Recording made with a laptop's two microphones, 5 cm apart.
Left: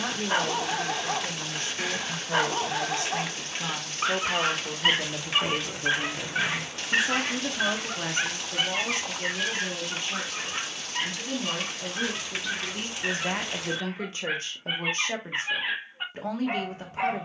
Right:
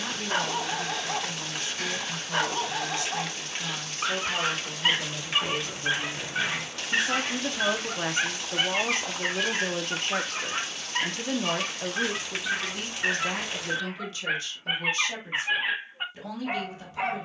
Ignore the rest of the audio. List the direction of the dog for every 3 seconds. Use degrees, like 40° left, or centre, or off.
10° left, 10° left, centre, 30° right, 30° right, 10° right.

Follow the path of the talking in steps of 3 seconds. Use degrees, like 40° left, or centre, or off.
50° left, 40° left, 10° right, 50° right, 20° left, 50° left.